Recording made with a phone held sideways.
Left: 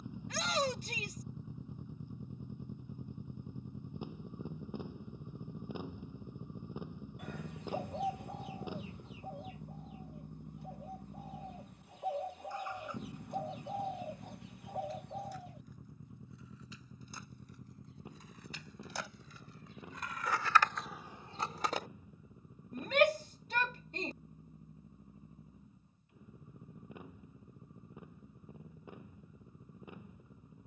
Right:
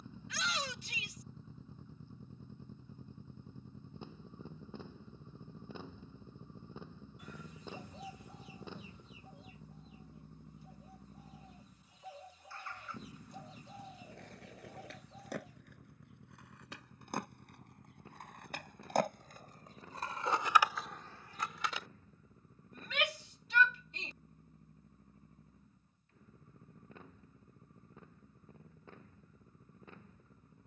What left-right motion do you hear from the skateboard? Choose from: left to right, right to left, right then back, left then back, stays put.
right to left.